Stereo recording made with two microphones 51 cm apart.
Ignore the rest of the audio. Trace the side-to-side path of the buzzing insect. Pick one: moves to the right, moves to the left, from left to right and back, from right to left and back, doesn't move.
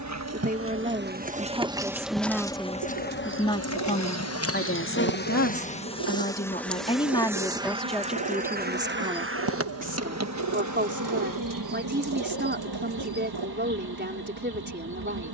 from right to left and back.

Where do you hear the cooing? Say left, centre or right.
right.